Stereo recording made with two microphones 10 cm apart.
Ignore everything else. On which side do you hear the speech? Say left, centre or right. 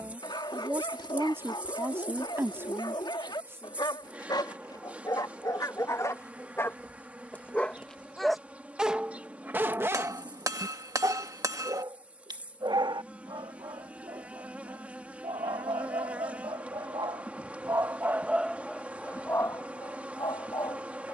right.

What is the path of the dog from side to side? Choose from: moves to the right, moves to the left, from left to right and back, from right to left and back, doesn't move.
from left to right and back.